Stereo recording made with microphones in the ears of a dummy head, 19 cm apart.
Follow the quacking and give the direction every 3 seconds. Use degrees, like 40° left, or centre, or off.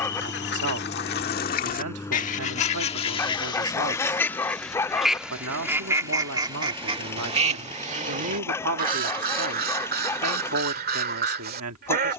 40° left, 10° left, 30° right, 40° right.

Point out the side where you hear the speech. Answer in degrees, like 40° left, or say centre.
80° right.